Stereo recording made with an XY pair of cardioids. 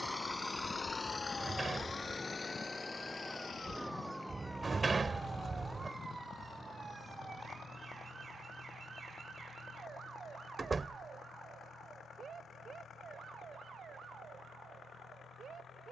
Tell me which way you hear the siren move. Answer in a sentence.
You can hear the siren go from the left side to the right.